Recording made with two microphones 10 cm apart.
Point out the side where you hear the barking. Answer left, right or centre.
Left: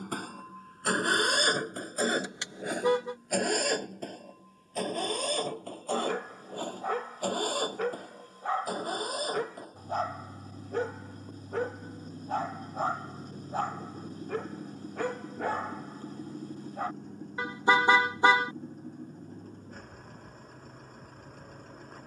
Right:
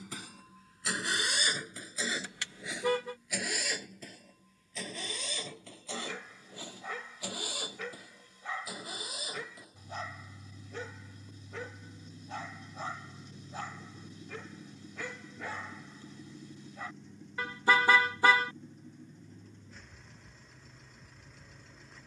left.